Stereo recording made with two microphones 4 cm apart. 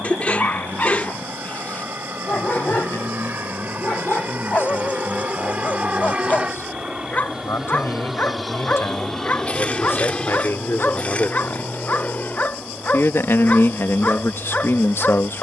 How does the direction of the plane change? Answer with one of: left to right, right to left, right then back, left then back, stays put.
right to left.